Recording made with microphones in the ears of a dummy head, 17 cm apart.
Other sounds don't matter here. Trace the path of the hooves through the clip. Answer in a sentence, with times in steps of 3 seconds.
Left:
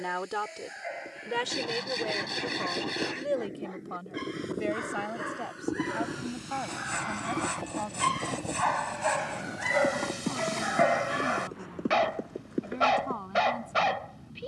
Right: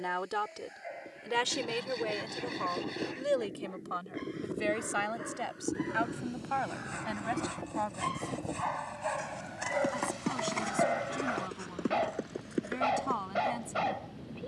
You can hear the hooves on the left from 0 s and on the right from 9 s.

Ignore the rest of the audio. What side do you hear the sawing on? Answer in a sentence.
You can hear the sawing on the left.